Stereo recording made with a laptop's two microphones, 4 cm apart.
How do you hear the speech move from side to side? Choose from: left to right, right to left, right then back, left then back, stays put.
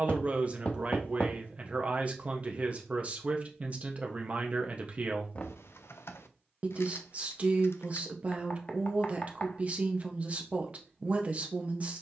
stays put.